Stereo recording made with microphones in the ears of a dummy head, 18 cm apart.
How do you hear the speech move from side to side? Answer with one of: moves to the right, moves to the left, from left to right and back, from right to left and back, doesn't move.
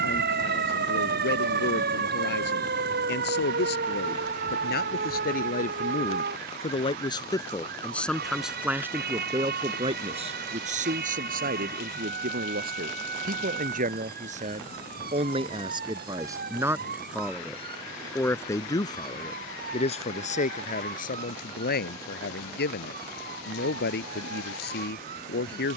from left to right and back.